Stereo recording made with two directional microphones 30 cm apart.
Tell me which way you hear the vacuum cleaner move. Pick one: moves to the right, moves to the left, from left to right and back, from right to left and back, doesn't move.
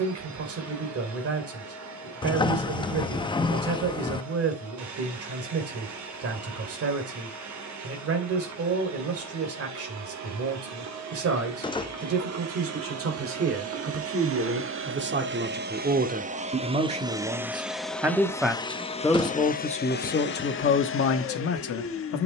moves to the left.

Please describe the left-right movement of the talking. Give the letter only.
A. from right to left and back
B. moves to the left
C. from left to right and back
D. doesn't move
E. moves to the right
B.